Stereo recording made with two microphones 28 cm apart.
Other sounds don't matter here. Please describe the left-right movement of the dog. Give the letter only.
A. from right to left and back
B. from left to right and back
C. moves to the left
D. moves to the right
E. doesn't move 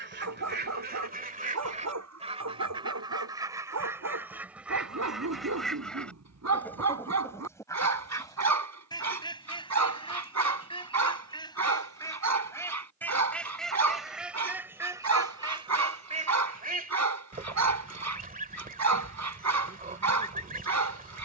E.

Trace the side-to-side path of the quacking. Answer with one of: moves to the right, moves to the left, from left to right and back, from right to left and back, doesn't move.
from right to left and back.